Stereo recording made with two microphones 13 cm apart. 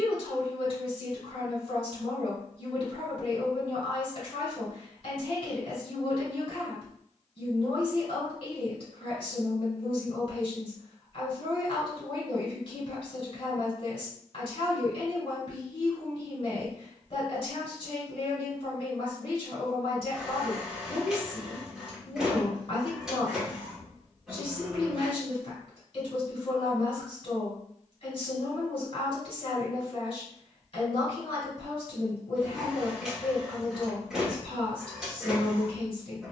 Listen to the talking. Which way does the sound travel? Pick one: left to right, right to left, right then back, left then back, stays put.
stays put.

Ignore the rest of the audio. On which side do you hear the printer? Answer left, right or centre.
centre.